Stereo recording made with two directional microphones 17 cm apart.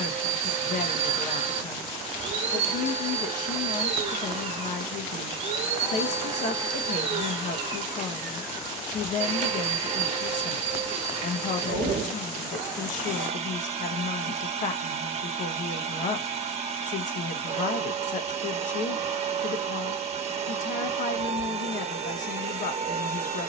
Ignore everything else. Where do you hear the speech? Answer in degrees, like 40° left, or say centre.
50° left.